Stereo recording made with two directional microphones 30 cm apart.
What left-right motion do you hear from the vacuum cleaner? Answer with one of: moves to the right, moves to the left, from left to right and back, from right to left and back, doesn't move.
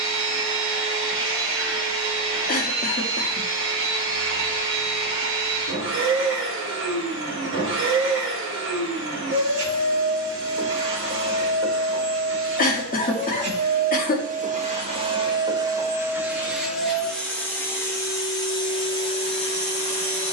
moves to the left.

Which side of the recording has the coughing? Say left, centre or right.
left.